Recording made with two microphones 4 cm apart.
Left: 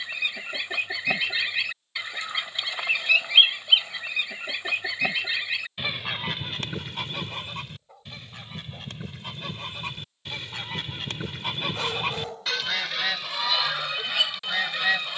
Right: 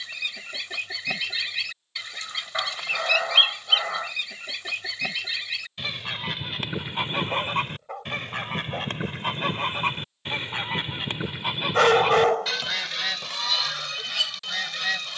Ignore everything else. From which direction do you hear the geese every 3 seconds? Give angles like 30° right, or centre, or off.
20° left, 20° left, 40° right, 30° right, 10° left.